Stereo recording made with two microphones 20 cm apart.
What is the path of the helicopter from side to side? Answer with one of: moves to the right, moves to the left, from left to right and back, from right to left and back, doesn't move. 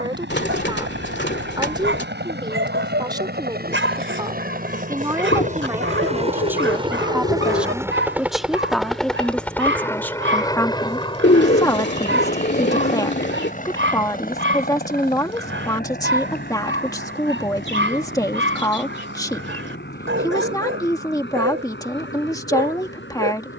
moves to the left.